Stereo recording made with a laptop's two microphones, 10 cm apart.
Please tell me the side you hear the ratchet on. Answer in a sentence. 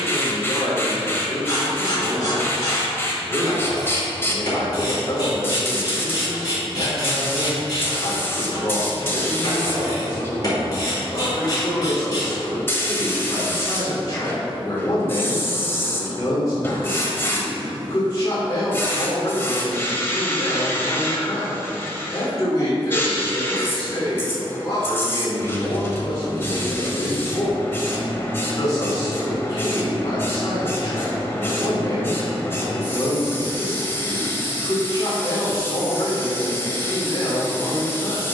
You can hear the ratchet on the left.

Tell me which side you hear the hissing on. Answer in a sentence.
You can hear the hissing on the left.